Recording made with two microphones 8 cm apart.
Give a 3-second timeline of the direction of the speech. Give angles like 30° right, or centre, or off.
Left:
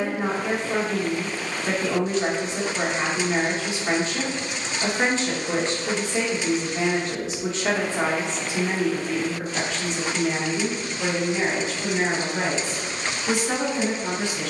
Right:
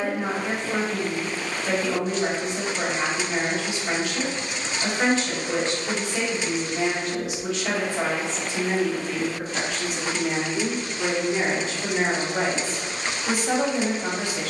30° left, 30° left, 30° left, 10° right, 40° right.